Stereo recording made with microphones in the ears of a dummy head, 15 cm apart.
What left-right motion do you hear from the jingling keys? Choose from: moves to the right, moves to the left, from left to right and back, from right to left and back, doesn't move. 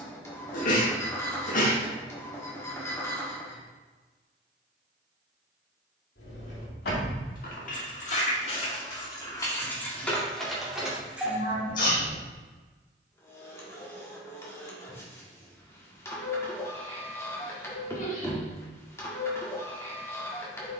moves to the right.